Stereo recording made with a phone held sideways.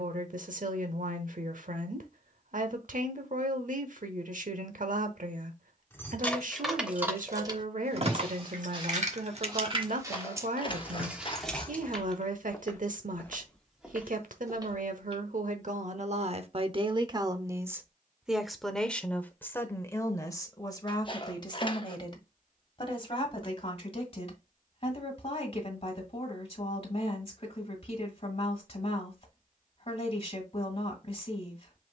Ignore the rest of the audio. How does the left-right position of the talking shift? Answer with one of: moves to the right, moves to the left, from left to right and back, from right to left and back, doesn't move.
moves to the left.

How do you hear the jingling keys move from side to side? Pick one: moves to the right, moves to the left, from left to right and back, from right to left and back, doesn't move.
from left to right and back.